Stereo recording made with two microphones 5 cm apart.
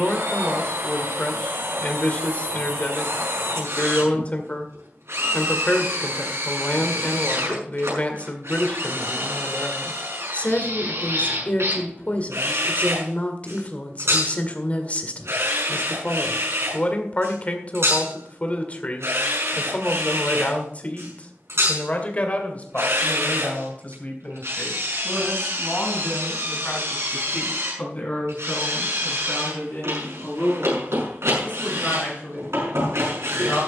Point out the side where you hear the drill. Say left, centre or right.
right.